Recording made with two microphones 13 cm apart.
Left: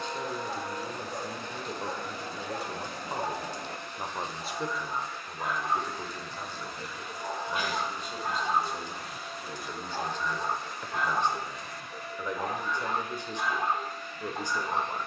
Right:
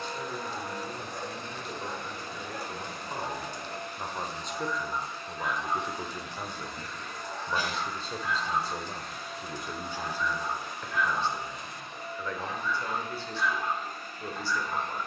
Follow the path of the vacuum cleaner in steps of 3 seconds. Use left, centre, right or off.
right, right, centre, centre, right.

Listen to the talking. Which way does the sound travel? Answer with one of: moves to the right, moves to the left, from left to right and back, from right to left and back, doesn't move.
from left to right and back.